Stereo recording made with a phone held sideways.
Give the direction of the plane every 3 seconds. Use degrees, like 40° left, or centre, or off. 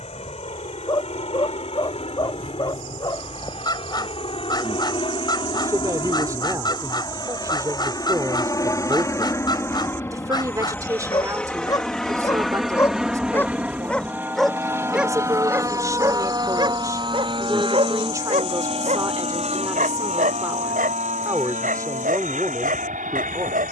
50° left, 40° left, 30° left, 10° left, 10° right, 30° right, 40° right, 60° right.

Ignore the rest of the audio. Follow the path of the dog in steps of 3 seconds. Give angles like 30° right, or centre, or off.
30° left, 30° left, 30° left, 30° left, 10° left, 30° right, 60° right, 80° right.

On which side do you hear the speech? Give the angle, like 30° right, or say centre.
20° right.